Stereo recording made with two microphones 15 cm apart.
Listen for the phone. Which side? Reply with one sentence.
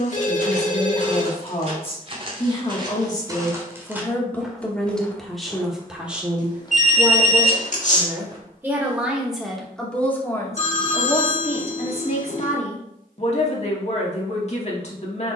In this clip you hear the phone on the left.